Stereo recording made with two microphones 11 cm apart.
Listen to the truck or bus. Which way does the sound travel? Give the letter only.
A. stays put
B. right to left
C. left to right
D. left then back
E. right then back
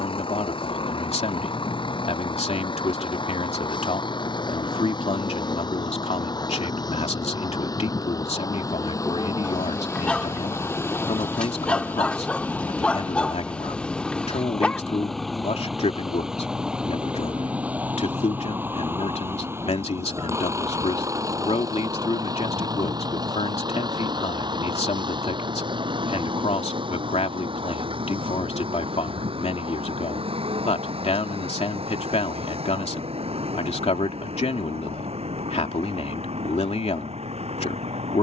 C.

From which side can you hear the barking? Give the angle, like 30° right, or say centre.
10° left.